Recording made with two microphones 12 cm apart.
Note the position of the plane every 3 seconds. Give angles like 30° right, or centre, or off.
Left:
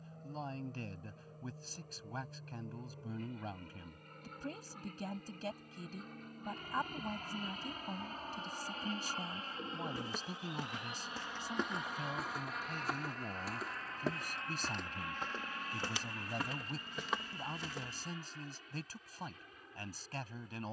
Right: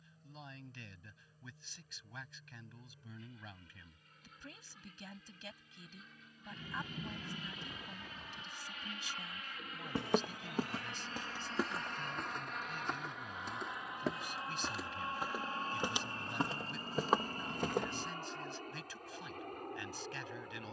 70° left, 60° left, 50° left, 20° left, 10° right, 30° right, 50° right.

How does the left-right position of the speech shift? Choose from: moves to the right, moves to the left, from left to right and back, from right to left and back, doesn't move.
doesn't move.